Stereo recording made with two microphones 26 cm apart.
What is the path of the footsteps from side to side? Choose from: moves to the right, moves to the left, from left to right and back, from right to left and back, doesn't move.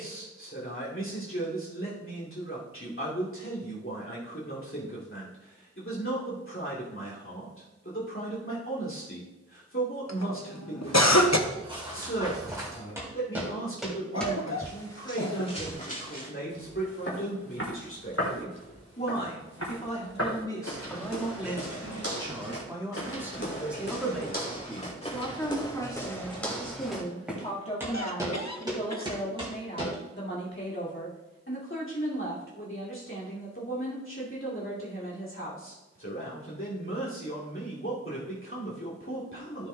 from right to left and back.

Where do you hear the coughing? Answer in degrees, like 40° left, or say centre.
80° left.